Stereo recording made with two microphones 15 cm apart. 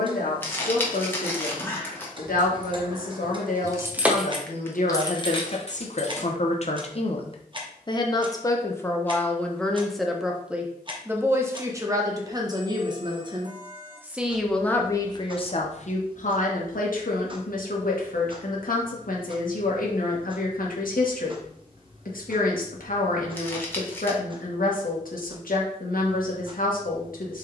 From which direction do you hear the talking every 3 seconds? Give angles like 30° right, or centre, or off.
80° left, 60° left, 40° left, 10° right, 20° right, 60° left, 70° left, 70° left, 70° left.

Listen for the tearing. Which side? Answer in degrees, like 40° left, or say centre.
10° left.